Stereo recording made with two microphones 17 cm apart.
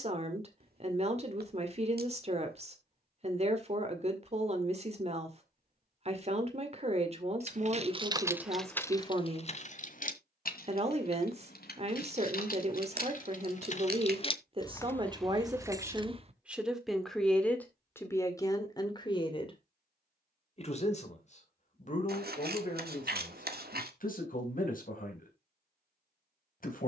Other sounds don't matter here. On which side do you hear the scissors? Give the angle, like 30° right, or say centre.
70° right.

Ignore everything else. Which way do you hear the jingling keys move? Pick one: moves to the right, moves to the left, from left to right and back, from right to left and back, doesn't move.
from right to left and back.